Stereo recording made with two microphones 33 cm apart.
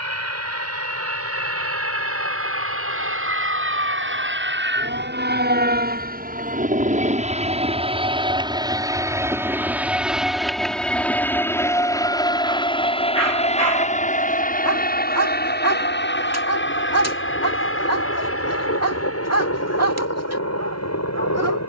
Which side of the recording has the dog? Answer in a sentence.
In this clip you hear the dog on the right.